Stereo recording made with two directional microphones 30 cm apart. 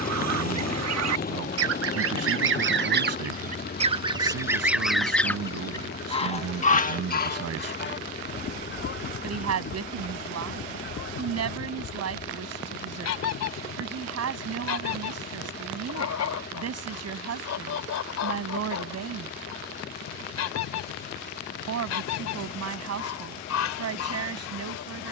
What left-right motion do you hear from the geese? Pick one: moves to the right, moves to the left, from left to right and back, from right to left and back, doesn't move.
moves to the left.